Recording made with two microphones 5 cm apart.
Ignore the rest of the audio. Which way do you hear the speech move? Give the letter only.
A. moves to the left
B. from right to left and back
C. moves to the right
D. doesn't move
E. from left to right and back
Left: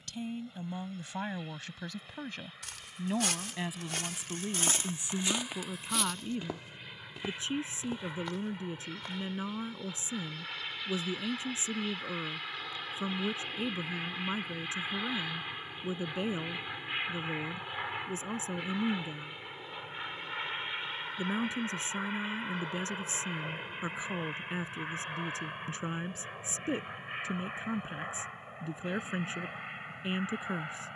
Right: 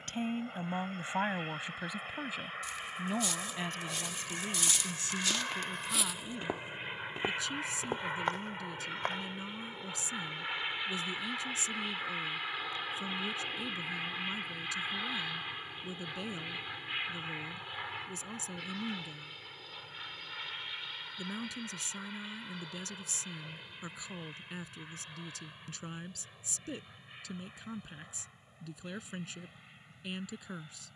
A.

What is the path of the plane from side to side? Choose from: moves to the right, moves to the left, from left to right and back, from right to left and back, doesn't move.
moves to the left.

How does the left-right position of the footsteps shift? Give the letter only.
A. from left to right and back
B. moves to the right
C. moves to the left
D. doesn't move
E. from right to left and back
B.